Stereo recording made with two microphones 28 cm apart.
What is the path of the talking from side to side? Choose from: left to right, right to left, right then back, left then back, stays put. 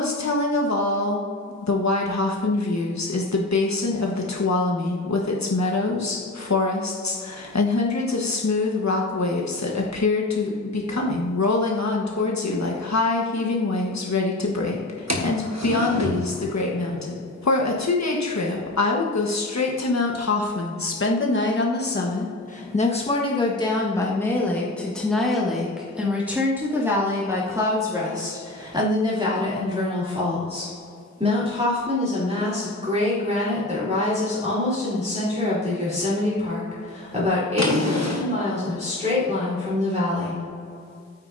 left to right.